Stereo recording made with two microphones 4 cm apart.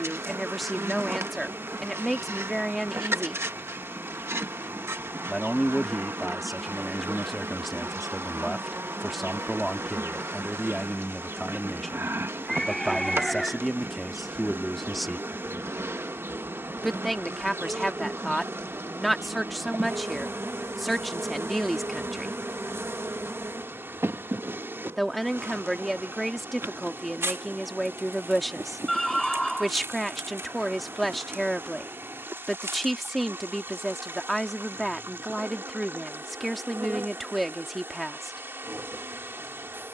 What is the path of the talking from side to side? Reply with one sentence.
In this clip you hear the talking stay in one place.